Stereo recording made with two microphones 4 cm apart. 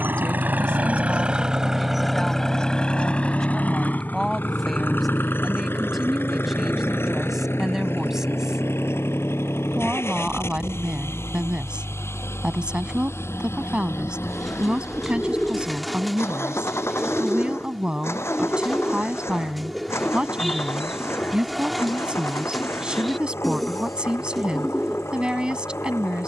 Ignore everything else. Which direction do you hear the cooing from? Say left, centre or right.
centre.